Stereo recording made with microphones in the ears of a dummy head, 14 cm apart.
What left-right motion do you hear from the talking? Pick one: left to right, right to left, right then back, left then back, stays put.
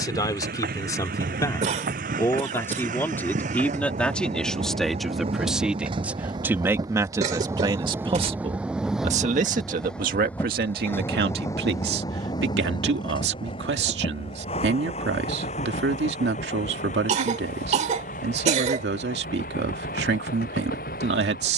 left to right.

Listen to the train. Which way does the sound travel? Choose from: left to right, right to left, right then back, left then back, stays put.
right to left.